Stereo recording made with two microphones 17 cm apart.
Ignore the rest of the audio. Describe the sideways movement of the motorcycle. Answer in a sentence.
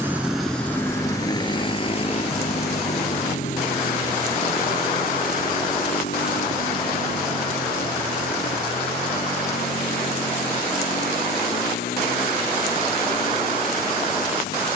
In this clip you hear the motorcycle go from the right side to the left.